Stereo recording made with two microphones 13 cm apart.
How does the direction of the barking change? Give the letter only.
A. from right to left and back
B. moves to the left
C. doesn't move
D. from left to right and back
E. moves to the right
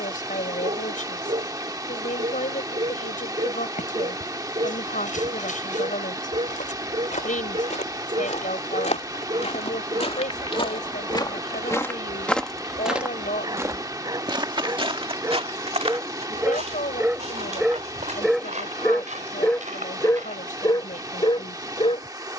B.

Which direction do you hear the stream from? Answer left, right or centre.
right.